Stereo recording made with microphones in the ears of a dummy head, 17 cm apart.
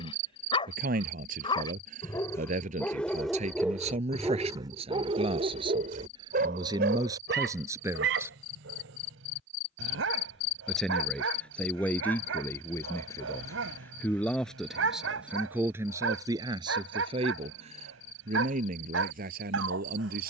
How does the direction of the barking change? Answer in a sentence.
In this clip you hear the barking move from left to right.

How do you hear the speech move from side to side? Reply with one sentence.
You can hear the speech go left and come back.